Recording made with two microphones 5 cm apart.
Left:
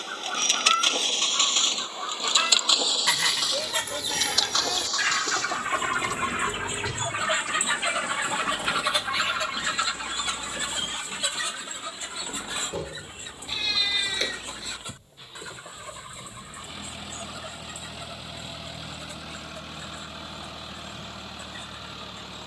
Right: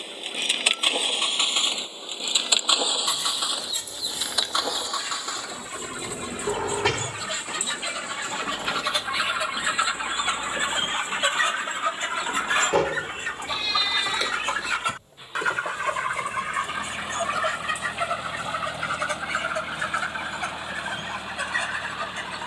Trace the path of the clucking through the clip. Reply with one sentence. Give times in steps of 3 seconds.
You can hear the clucking on the left from 0 s and on the right from 9 s.